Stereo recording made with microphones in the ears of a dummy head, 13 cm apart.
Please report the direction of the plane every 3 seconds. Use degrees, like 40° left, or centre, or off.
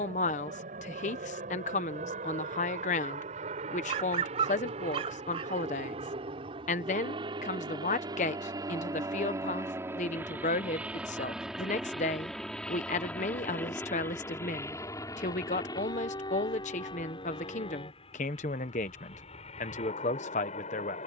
60° right, 50° right, 30° right, 10° right, 10° left, 30° left, 40° left.